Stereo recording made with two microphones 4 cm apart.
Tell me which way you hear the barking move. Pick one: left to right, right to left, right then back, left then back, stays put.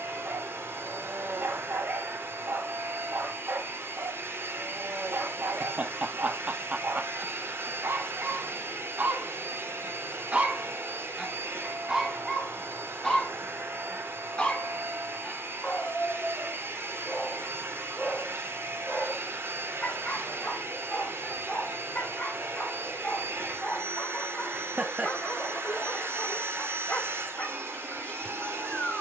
right to left.